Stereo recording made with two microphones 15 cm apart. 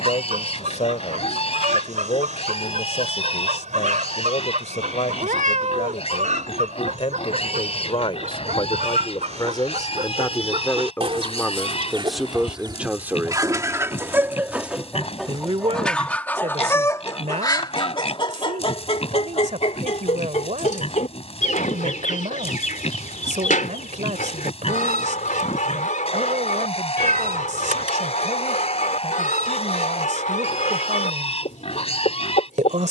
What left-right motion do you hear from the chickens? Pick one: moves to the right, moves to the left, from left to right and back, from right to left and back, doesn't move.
moves to the left.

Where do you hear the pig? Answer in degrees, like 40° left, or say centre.
40° left.